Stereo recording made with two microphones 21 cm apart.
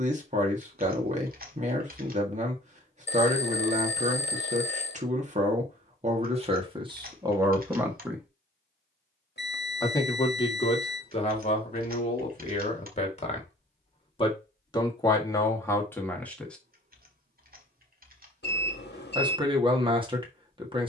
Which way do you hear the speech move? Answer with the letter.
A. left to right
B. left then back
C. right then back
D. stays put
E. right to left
B.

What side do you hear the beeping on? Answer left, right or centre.
left.